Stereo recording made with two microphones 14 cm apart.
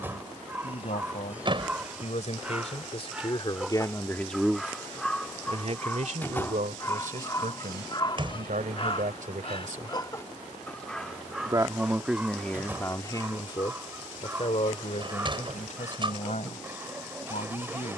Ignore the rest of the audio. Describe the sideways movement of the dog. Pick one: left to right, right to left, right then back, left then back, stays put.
left then back.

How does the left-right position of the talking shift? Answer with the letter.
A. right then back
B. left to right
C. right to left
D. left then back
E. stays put
A.